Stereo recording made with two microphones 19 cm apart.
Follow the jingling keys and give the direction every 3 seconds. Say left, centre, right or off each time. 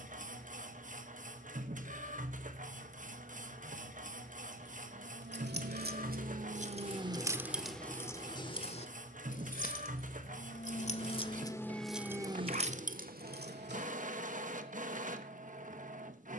off, right, centre, left, right, off.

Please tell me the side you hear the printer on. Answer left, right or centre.
right.